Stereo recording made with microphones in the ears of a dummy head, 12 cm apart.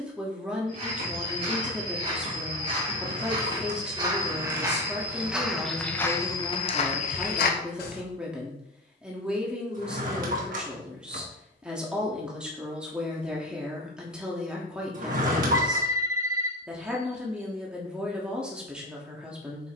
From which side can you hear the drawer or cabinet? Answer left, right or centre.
right.